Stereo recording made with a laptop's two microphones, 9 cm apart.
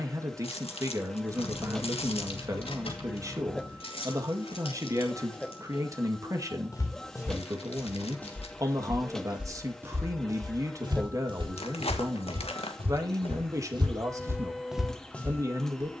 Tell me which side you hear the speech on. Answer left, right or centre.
right.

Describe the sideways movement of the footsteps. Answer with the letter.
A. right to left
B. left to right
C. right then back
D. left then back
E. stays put
C.